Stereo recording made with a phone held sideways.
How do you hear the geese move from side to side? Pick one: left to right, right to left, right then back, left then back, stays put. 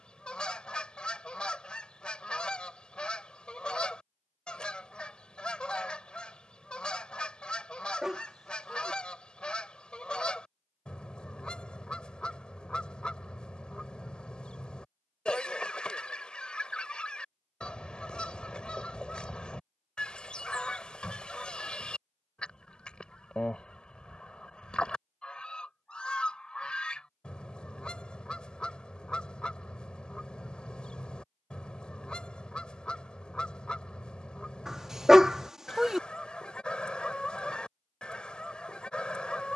stays put.